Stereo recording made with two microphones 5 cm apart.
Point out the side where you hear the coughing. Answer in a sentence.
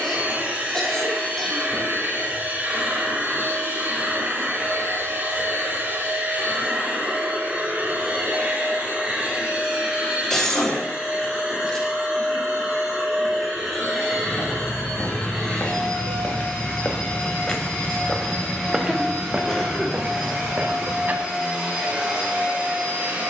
You can hear the coughing in the centre.